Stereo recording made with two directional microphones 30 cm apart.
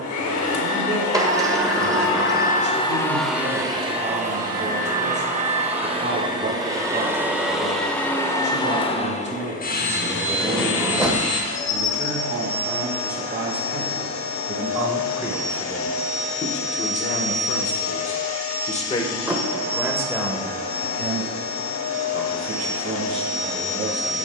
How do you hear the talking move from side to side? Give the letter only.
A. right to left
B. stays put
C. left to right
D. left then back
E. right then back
D.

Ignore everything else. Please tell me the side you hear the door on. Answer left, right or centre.
centre.